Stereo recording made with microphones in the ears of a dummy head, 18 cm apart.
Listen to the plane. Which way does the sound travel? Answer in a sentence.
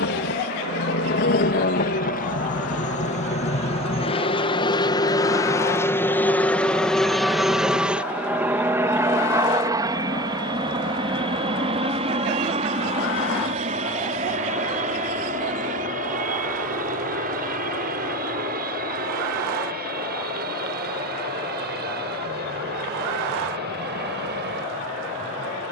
You can hear the plane travel towards the right.